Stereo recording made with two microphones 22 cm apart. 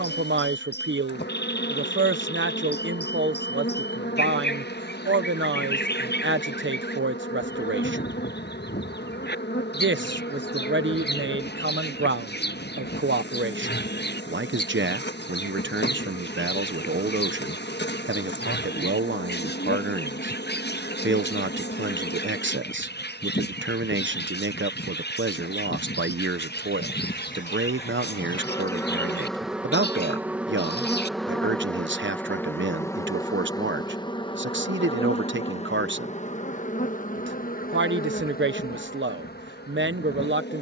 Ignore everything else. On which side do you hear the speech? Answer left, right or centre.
right.